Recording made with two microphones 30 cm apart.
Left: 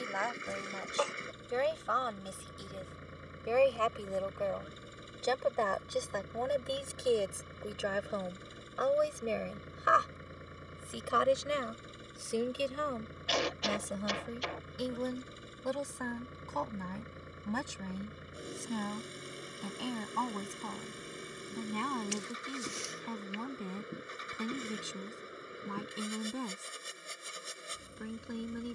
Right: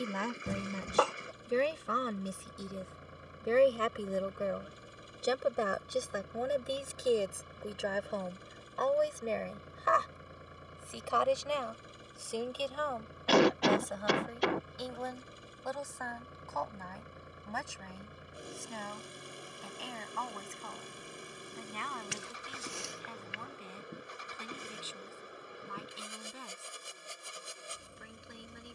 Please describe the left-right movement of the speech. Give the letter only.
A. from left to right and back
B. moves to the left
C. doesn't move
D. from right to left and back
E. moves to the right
B.